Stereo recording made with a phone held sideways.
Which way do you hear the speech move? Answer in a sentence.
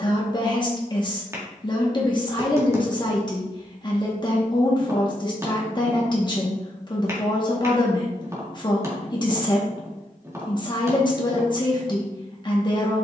In this clip you hear the speech stay in one place.